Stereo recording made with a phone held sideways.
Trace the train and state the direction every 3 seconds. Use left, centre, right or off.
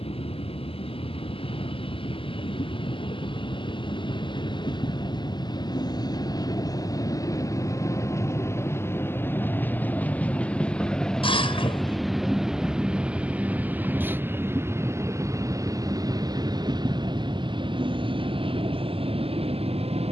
left, left, left, centre, centre, right, right.